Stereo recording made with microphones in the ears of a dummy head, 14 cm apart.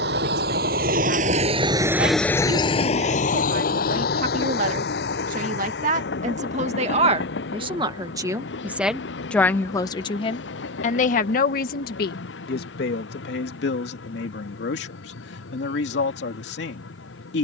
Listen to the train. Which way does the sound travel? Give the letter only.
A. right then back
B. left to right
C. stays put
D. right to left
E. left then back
D.